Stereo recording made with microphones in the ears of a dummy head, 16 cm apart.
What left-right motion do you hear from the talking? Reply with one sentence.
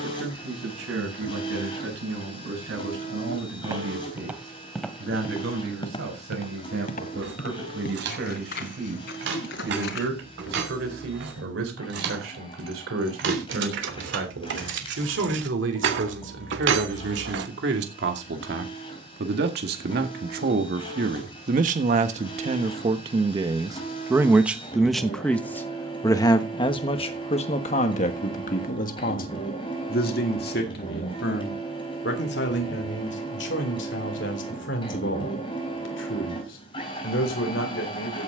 You can hear the talking travel towards the left.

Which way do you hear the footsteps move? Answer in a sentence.
In this clip you hear the footsteps move from right to left.